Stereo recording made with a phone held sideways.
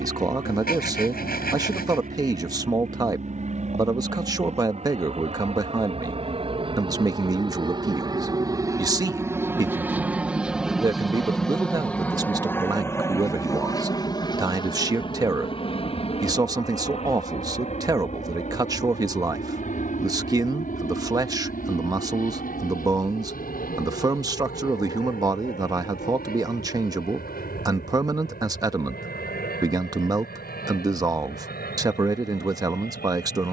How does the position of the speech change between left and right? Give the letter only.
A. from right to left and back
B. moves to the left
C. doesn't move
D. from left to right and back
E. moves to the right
C.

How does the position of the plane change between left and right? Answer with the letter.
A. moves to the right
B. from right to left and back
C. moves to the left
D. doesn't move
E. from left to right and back
C.